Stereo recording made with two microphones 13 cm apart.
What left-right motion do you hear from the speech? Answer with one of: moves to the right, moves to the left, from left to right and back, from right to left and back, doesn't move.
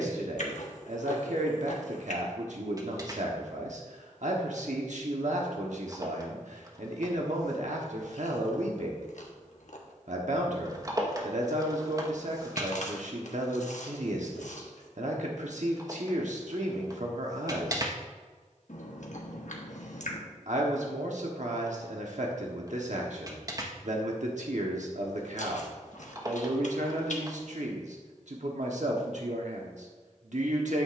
doesn't move.